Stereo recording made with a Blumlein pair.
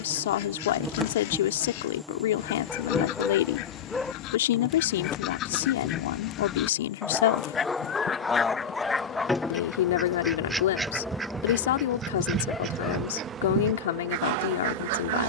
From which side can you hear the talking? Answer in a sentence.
In this clip you hear the talking on the left.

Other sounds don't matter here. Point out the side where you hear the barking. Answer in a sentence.
You can hear the barking in the centre.